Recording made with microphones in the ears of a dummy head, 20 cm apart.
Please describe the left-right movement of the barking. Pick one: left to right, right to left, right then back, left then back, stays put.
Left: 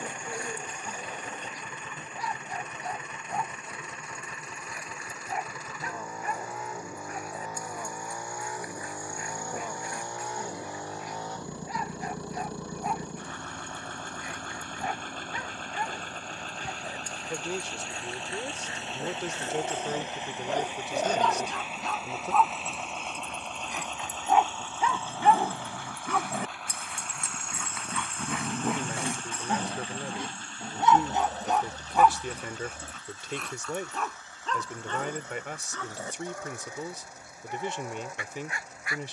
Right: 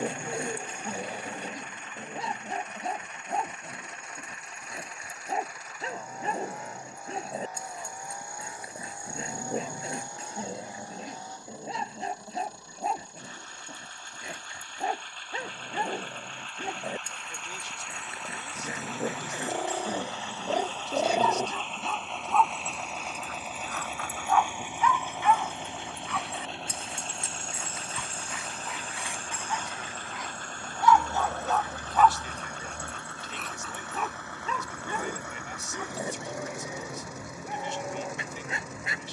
left then back.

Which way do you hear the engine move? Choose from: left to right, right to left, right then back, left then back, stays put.
left to right.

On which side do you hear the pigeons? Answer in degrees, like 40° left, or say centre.
10° right.